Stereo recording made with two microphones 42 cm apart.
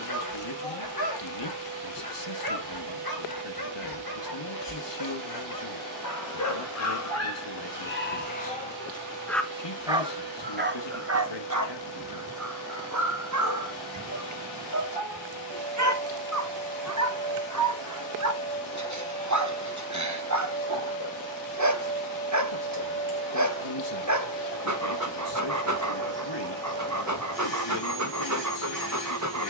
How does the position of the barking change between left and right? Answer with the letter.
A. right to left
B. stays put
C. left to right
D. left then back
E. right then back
C.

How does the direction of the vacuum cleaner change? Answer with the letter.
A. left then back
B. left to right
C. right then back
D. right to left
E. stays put
E.